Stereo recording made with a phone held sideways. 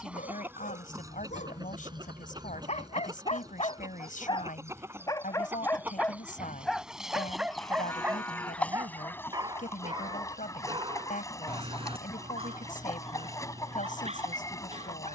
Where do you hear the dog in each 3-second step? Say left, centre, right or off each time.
left, left, centre, right, right.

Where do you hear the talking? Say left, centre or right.
left.